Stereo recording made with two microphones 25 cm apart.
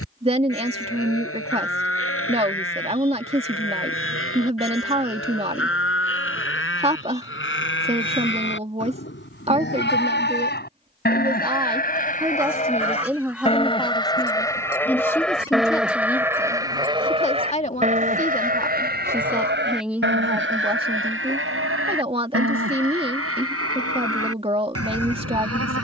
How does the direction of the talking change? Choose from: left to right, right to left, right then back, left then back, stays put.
left then back.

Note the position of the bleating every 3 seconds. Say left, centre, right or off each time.
left, left, left, left, left, centre, right, right, right.